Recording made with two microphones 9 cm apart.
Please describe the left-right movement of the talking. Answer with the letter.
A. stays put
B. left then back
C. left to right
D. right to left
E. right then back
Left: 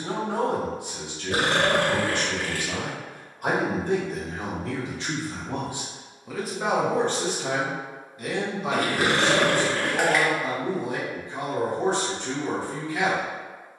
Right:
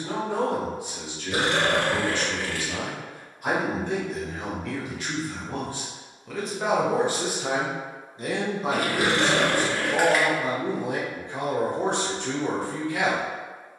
C.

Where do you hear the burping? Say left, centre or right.
left.